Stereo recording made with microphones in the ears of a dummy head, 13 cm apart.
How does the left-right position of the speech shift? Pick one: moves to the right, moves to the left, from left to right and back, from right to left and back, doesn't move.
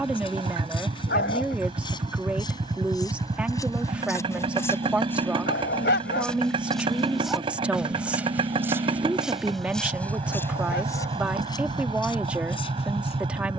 doesn't move.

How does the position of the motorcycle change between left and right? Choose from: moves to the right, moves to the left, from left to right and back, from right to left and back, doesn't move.
doesn't move.